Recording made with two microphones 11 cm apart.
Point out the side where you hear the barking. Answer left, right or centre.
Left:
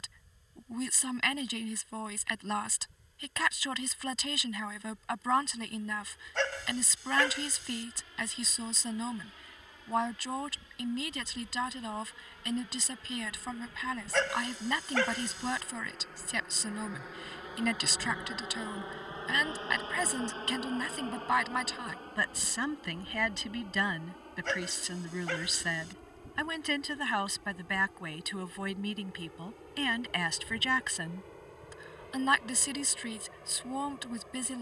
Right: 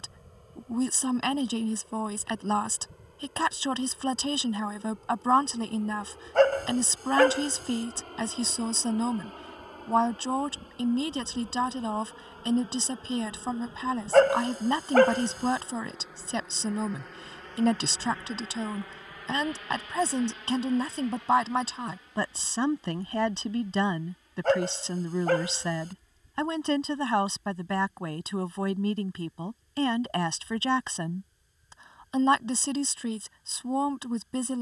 right.